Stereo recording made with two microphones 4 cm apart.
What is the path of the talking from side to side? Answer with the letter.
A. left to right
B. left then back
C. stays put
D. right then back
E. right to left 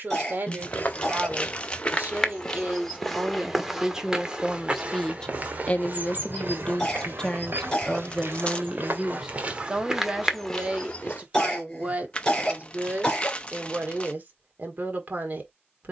B.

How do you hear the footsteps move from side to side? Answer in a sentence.
In this clip you hear the footsteps go right and come back.